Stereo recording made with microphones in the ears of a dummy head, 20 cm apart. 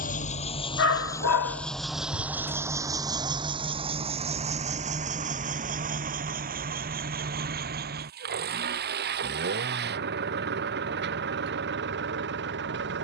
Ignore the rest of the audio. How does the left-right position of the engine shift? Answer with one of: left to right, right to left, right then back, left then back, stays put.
left to right.